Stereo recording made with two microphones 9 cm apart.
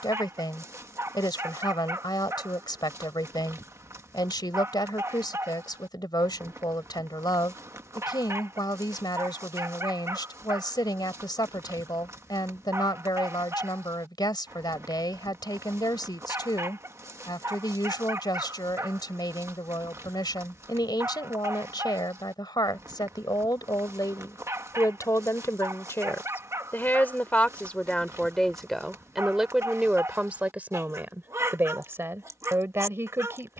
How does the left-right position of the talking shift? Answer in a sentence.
You can hear the talking travel towards the right.